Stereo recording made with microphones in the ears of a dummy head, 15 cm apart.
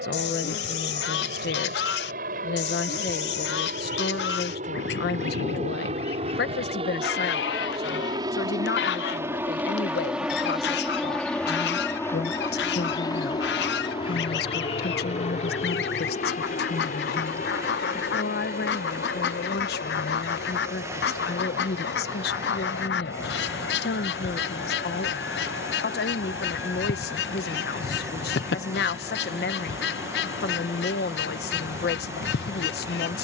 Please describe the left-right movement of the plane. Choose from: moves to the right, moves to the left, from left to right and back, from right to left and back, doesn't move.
moves to the left.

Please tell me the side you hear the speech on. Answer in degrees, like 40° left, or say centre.
70° left.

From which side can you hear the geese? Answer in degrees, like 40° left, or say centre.
70° left.